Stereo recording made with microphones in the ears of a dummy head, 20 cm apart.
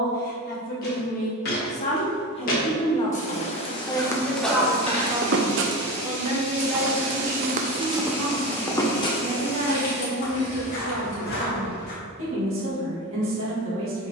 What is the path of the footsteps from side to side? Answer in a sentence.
You can hear the footsteps go right and come back.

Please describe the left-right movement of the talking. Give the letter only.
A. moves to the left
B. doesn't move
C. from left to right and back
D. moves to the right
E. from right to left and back
D.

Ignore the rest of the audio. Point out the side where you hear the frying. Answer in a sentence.
You can hear the frying on the left.